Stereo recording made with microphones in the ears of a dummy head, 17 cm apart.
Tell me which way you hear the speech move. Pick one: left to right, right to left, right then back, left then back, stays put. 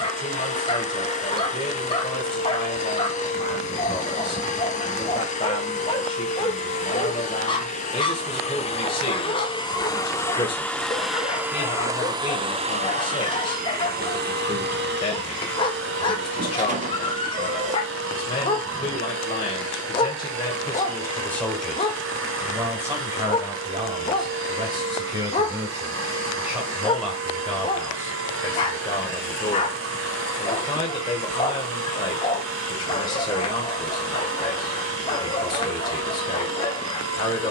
right then back.